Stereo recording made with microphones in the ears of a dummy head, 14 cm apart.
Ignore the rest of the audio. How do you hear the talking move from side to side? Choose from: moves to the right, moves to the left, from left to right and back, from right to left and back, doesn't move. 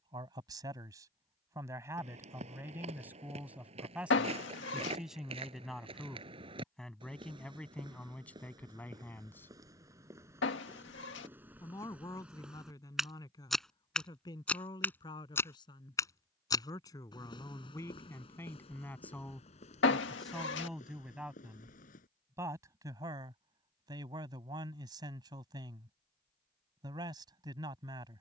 from right to left and back.